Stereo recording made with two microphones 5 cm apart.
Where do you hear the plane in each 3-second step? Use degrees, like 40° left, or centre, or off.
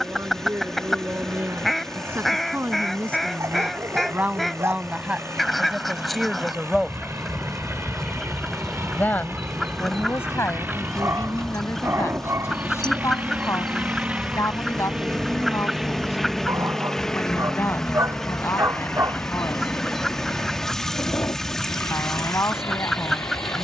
70° right, 70° right, 60° right, 50° right, 30° right, centre, 40° left, 50° left.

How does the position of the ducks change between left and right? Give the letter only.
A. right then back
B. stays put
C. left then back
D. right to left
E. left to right
B.